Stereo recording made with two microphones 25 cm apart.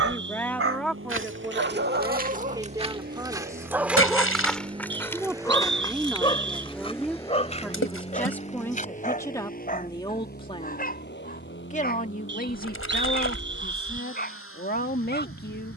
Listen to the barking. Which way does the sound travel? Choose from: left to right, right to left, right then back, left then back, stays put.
right to left.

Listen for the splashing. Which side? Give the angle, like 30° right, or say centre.
60° left.